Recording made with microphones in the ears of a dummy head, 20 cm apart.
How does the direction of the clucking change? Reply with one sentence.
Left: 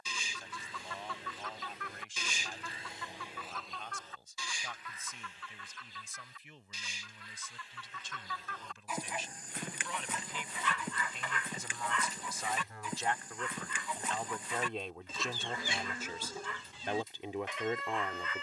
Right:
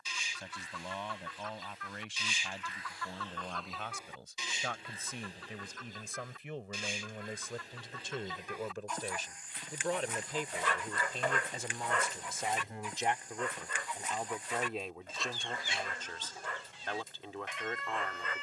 In this clip you hear the clucking go right and come back.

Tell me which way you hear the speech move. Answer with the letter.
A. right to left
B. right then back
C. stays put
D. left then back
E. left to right
A.